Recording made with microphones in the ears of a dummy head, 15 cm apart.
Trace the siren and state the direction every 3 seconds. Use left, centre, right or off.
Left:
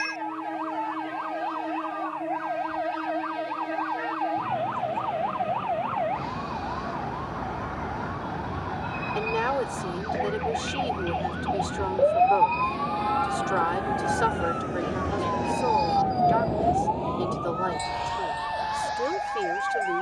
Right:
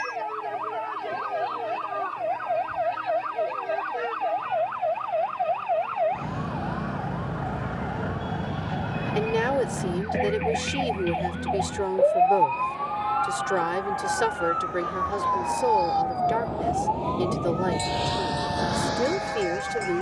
right, right, right, right, centre, left, left.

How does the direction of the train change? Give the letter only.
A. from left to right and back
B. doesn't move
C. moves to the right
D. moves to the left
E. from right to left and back
C.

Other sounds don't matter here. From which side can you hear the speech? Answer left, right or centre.
right.